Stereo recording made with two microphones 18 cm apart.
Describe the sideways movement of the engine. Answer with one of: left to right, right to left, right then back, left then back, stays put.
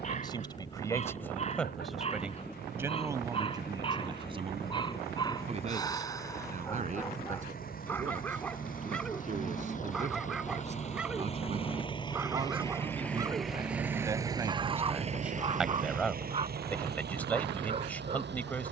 left to right.